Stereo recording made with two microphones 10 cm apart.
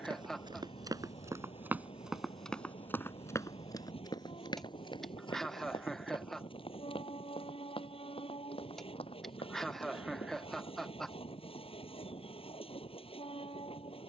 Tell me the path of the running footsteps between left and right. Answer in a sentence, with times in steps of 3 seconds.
You can hear the running footsteps on the right from 0 s, on the left from 3 s and not at all from 12 s.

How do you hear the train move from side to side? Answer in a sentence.
You can hear the train stay in one place.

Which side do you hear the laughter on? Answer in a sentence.
In this clip you hear the laughter in the centre.